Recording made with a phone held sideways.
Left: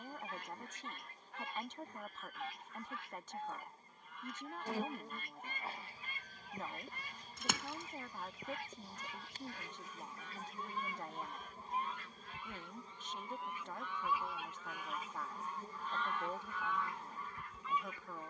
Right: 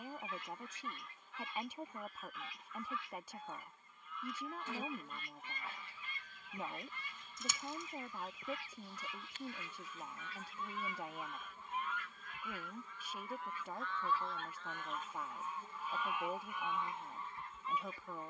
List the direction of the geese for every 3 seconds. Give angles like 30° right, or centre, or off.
50° left, 50° left, 50° left, 40° left, 20° left, 20° right.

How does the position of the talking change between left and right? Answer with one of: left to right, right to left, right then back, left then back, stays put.
stays put.